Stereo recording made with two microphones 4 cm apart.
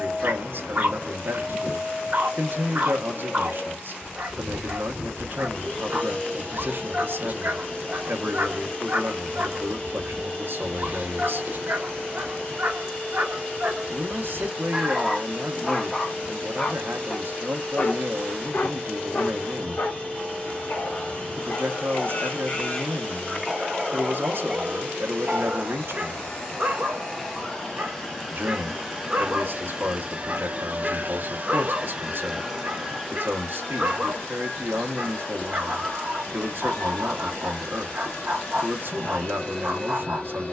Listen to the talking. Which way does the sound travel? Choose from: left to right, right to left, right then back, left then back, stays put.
stays put.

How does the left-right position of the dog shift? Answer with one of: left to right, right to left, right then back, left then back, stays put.
left then back.